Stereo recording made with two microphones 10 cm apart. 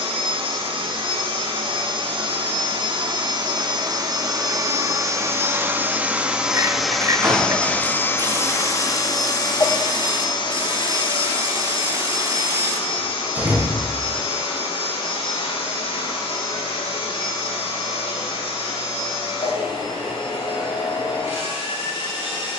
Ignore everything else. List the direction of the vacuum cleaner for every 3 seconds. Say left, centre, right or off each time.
right, right, centre, left, left, left, left, left.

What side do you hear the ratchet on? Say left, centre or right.
right.